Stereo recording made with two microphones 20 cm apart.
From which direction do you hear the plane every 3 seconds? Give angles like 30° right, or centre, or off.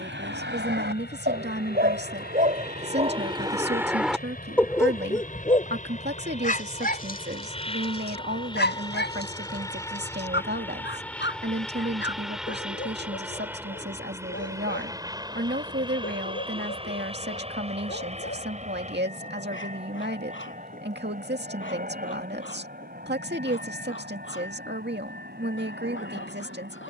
60° left, 50° left, 30° left, 10° left, 10° right, 20° right, 40° right, 40° right, 50° right.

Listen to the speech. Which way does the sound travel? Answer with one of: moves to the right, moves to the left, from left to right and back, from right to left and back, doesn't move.
doesn't move.